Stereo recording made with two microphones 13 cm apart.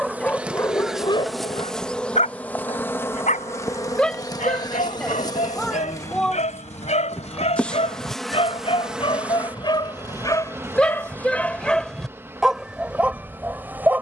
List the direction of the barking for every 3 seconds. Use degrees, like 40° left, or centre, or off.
30° left, 70° left, 60° left, 20° left, 10° right.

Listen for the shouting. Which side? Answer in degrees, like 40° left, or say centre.
10° left.